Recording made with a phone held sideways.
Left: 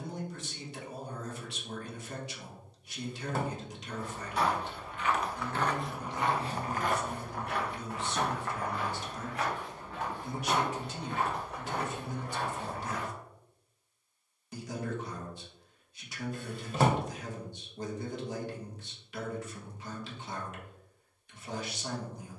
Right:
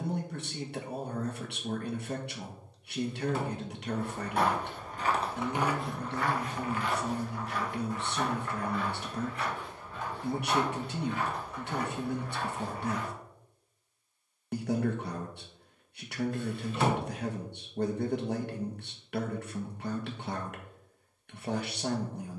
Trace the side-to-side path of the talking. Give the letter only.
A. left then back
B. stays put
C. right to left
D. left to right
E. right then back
B.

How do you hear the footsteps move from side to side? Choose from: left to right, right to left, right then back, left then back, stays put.
right to left.